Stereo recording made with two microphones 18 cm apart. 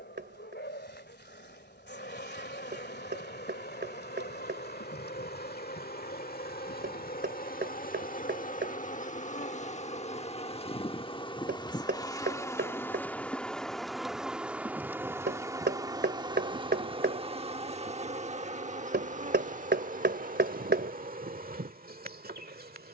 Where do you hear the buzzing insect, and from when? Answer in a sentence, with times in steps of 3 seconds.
You can hear the buzzing insect on the left from 0 s, in the centre from 12 s and on the right from 15 s.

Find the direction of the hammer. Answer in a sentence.
You can hear the hammer on the right.